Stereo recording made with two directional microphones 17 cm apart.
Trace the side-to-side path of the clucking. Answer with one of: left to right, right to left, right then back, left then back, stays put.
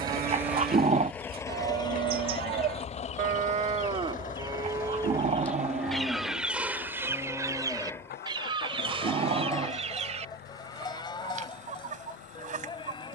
left to right.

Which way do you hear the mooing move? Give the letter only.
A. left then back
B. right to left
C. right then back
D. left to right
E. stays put
B.